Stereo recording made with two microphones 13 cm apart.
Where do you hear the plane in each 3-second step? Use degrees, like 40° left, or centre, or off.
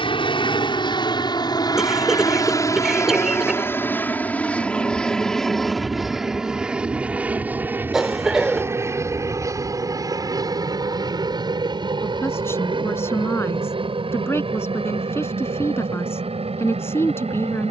30° left, 10° left, 10° right, 30° right, 40° right, 50° right.